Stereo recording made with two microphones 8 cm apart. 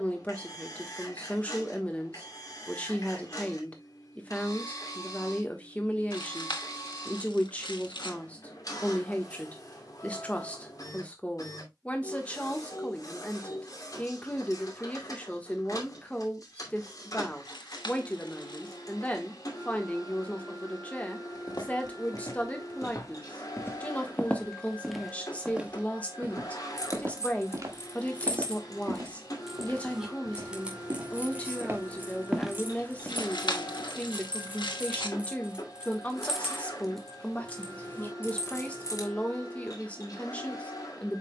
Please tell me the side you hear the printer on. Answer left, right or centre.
left.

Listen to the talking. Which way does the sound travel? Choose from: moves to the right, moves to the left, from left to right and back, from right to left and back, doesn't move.
doesn't move.